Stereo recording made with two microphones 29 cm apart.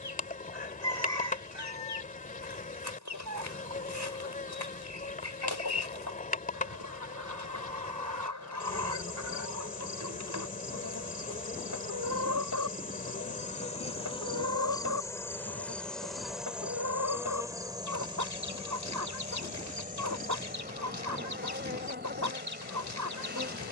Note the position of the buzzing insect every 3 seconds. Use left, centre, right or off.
left, left, left, left, left, centre, right, right.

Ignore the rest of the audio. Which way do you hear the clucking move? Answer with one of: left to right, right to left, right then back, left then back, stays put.
stays put.